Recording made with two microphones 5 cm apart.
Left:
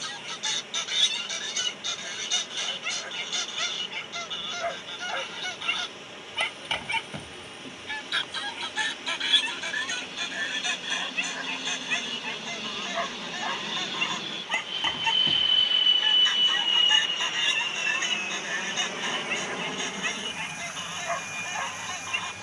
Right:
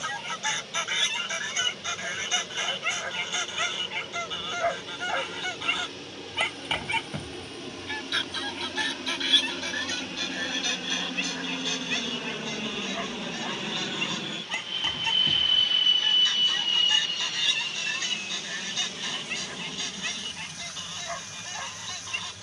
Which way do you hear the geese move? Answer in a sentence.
In this clip you hear the geese go from the right side to the left.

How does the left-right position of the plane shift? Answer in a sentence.
You can hear the plane go from the right side to the left.